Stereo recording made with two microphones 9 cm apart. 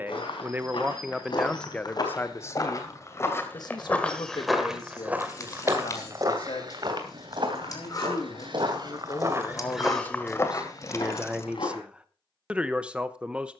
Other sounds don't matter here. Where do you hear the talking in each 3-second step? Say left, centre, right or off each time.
centre, left, left, centre, centre.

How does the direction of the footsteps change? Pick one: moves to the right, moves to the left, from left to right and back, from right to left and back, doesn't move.
from left to right and back.